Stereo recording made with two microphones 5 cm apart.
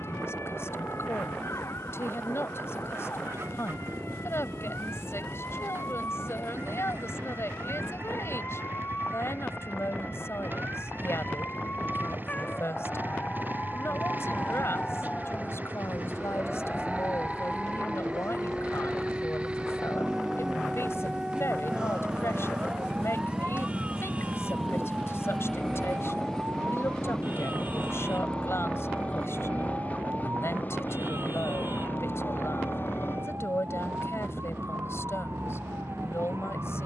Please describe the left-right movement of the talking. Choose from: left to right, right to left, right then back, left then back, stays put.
stays put.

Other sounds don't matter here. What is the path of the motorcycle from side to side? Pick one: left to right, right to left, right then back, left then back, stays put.
right to left.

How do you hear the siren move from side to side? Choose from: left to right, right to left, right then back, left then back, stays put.
left to right.